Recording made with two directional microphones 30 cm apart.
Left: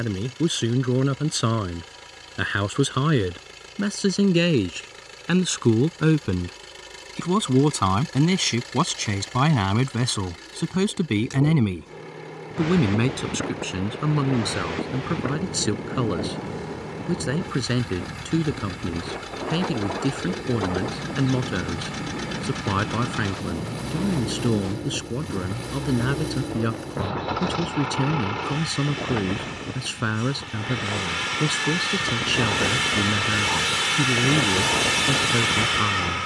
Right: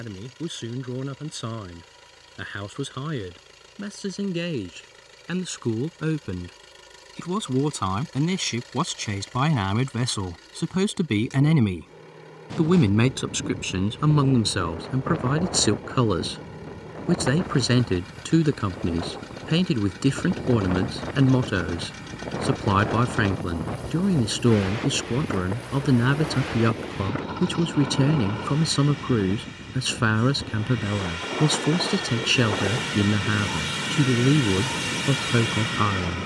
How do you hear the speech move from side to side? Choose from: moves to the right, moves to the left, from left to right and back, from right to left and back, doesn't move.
moves to the right.